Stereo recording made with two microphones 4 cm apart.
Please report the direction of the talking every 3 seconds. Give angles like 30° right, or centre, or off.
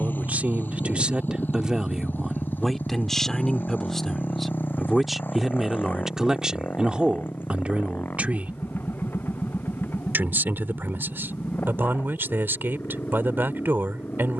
20° right, centre, 30° right, 60° right, 60° right.